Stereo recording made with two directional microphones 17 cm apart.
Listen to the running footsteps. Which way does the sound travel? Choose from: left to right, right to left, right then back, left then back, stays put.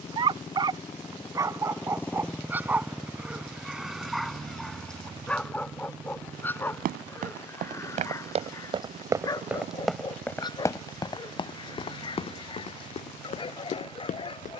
right to left.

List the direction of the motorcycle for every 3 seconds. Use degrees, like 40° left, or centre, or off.
20° left, 20° right, 40° right, 50° right, 60° right.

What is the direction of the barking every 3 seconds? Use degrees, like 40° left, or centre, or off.
20° right, centre, 20° left, 30° left, 30° left.